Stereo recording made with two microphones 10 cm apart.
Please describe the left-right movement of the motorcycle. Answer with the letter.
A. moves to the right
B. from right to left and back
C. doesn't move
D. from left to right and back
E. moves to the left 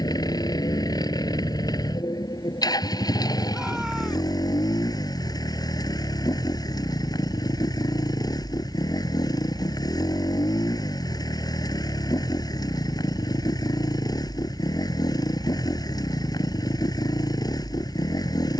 C.